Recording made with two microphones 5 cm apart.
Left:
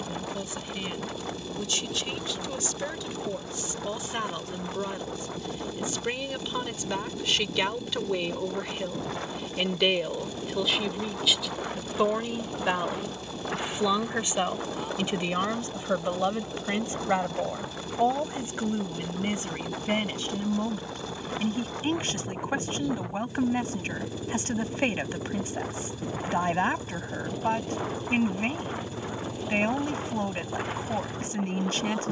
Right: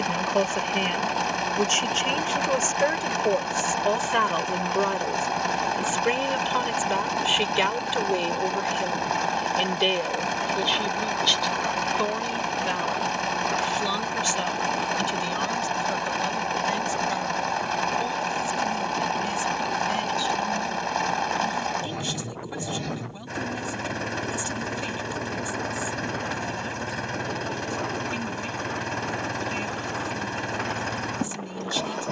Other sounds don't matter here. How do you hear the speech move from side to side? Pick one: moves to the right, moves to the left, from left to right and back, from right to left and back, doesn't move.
moves to the left.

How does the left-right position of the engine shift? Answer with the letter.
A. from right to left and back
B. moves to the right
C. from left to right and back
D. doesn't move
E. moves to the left
D.